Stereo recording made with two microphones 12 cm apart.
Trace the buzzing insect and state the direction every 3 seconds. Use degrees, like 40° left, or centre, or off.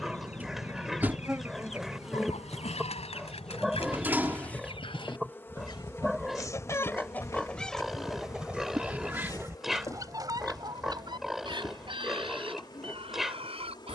10° right, 10° left, 30° left, 30° left, 40° left.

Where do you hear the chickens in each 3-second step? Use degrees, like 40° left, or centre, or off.
70° left, 50° left, 10° left, 30° right, 50° right.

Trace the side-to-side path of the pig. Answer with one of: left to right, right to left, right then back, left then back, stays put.
stays put.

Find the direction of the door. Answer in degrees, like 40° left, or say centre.
20° right.